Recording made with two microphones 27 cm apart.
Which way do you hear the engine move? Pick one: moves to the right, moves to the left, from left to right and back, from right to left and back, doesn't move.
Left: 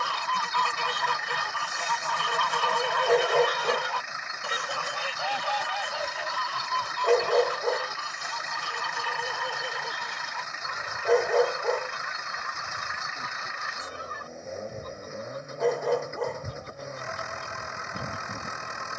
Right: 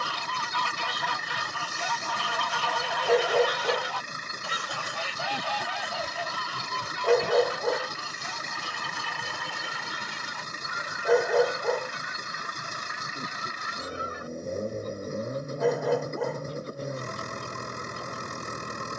doesn't move.